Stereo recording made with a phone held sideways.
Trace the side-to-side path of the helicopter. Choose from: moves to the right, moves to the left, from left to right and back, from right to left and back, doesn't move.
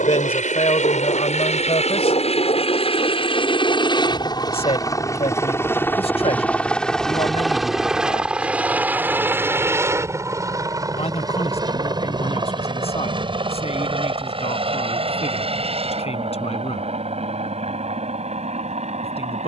moves to the right.